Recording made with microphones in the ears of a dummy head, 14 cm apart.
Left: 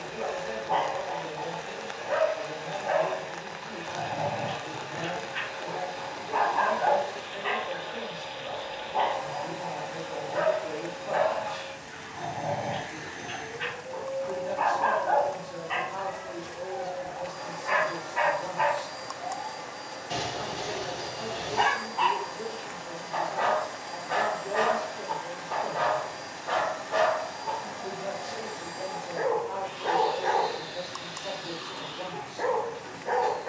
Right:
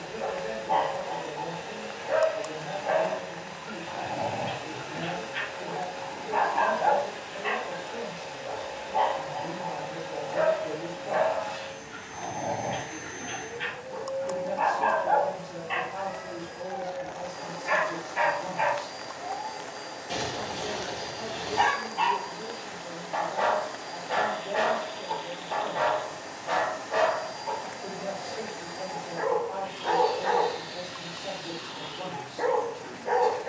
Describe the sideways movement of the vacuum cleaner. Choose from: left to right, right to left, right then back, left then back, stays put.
stays put.